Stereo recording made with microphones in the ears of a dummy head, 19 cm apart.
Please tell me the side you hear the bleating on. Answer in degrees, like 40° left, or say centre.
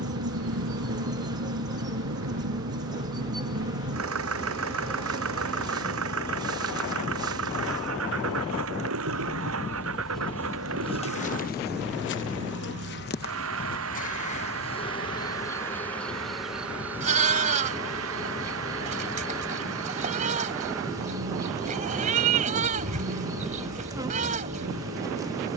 40° right.